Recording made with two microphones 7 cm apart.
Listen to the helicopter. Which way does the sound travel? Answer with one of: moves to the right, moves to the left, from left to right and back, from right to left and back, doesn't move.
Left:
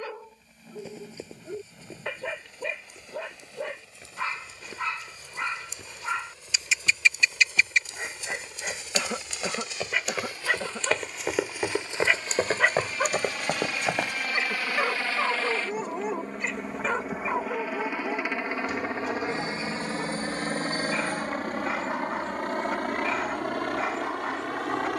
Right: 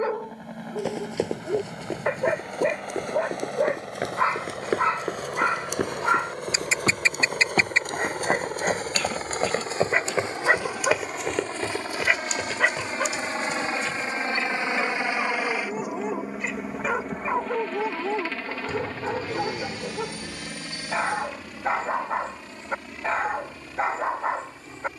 moves to the left.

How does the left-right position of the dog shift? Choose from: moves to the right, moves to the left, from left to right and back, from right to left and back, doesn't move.
from right to left and back.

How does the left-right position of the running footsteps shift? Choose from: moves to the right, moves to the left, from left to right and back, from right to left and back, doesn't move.
moves to the left.